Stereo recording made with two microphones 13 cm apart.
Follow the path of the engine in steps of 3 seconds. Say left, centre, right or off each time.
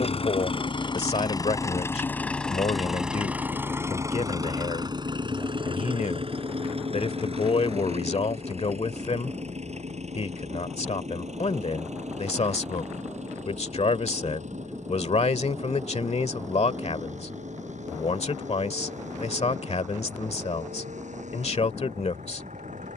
left, right, right, right, right, right, right, right.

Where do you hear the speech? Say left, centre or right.
left.